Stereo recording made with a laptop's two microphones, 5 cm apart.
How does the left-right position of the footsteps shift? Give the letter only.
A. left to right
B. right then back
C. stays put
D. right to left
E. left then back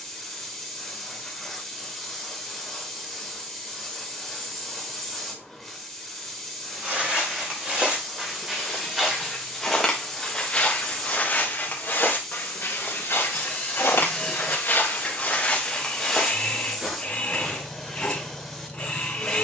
E.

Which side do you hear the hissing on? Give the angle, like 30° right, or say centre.
centre.